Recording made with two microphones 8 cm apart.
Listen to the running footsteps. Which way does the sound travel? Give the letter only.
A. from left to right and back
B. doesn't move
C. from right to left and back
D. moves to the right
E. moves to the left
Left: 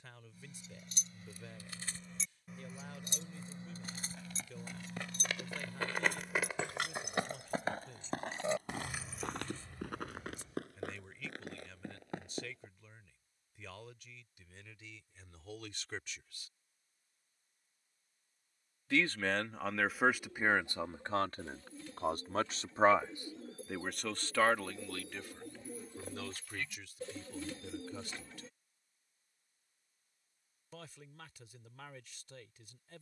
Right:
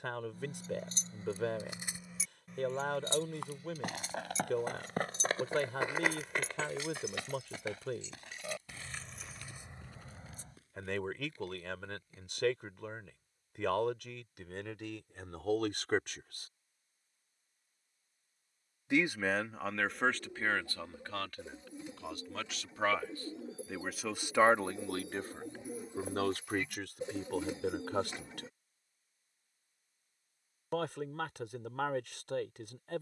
E.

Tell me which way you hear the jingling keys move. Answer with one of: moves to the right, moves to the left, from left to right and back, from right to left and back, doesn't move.
from right to left and back.